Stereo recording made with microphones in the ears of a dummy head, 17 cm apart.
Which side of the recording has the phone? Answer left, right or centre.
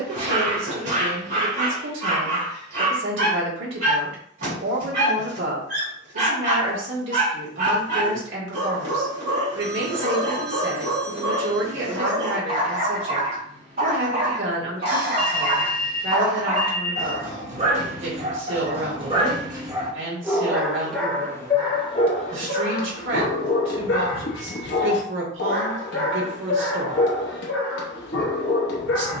right.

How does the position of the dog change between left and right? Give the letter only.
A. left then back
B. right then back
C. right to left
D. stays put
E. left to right
C.